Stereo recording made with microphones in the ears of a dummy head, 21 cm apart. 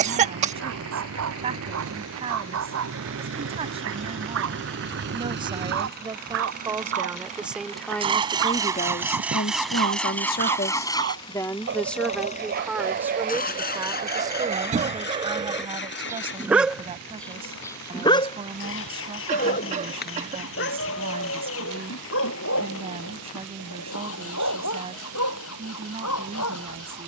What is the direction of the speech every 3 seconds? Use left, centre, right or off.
right, right, centre, left, centre, right, right, right, right.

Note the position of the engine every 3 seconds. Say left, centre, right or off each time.
right, right, right, centre, left, left, left, left, left.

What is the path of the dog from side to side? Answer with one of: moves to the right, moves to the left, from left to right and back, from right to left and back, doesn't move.
moves to the left.